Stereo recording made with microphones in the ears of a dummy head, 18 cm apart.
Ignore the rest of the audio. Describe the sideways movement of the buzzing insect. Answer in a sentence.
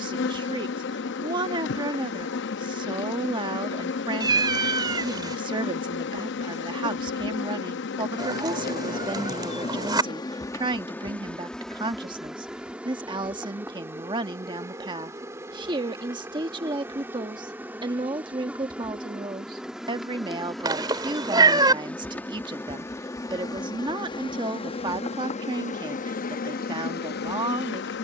You can hear the buzzing insect go right and come back.